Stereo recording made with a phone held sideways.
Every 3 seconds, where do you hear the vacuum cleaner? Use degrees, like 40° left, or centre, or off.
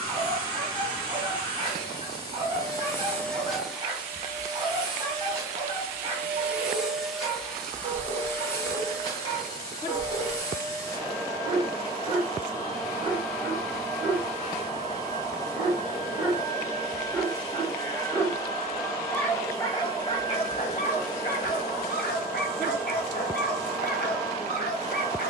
20° left, 10° right, centre, 20° left, 20° left, 20° left, 20° left, 20° left, 20° left.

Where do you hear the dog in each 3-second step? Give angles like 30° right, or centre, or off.
30° right, 30° right, 30° right, 30° right, 30° right, 20° right, 20° left, 60° left, 60° left.